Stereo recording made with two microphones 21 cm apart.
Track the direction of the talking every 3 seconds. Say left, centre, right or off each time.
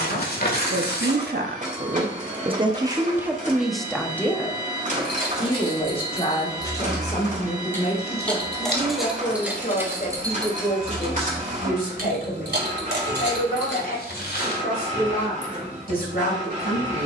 right, centre, left, left, left, left.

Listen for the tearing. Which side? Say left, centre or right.
left.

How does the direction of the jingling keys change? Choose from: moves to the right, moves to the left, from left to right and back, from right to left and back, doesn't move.
moves to the right.